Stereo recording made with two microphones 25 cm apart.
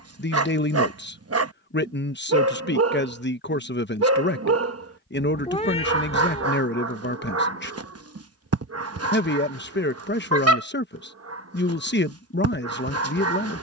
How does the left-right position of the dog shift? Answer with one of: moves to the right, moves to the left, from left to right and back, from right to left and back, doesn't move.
doesn't move.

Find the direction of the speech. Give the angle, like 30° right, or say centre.
50° left.